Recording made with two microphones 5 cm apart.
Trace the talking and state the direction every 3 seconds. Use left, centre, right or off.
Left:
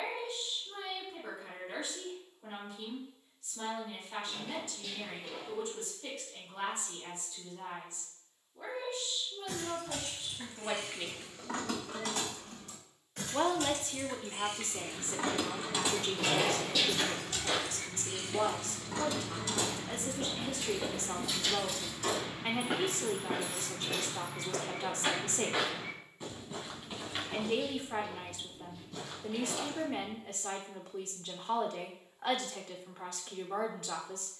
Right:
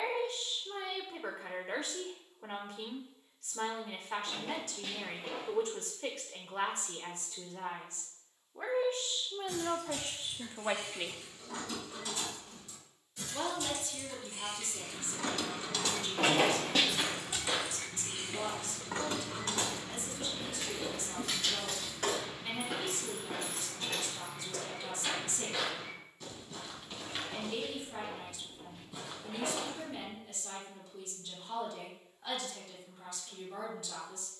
right, right, right, right, left, left, left, left, left, left, left, left.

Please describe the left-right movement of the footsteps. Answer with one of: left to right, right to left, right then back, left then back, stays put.
left then back.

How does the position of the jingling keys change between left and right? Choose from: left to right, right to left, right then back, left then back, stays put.
left to right.